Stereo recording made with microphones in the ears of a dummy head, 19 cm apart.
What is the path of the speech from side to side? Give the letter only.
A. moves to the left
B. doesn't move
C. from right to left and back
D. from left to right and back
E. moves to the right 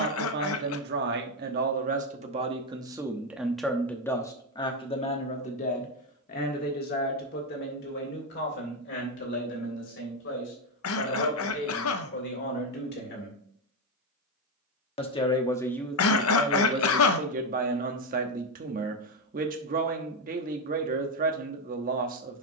C.